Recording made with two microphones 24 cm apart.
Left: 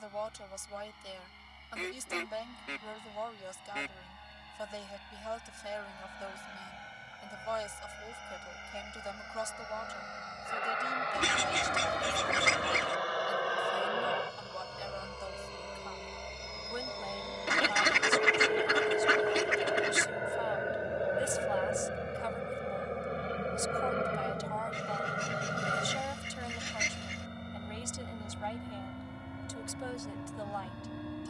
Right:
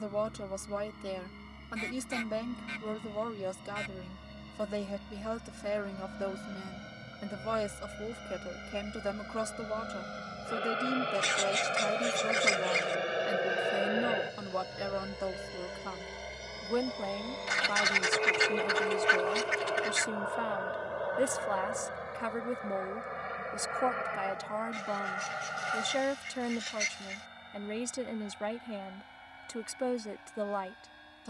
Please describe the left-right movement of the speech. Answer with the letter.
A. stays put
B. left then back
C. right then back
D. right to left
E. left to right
A.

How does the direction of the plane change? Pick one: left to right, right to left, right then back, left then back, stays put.
right to left.